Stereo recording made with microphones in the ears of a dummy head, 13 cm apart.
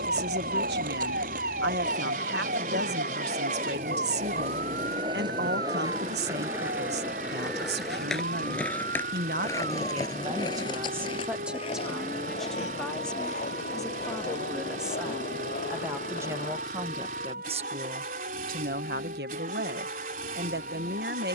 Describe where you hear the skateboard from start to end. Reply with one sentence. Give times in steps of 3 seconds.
In this clip you hear the skateboard on the right from 0 s, in the centre from 6 s, on the left from 9 s and not at all from 18 s.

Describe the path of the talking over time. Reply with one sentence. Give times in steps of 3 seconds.
You can hear the talking on the right from 0 s, in the centre from 12 s and on the right from 15 s.